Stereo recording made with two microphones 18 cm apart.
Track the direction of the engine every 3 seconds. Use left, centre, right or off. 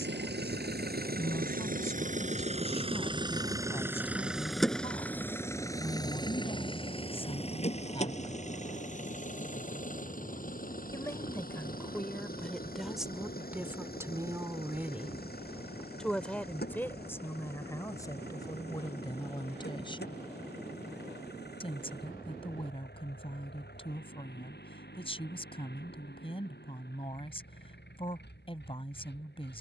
right, centre, left, left, left, left, left, left, left, left.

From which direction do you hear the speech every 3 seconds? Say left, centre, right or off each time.
left, left, left, centre, centre, centre, left, left, left, left.